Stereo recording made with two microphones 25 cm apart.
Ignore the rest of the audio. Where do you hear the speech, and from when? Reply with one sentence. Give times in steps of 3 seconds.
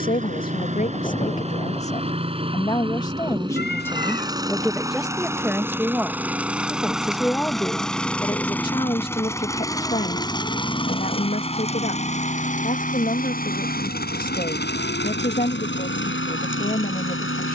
You can hear the speech on the left from 0 s, in the centre from 3 s and on the left from 9 s.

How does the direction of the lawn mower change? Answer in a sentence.
You can hear the lawn mower travel towards the left.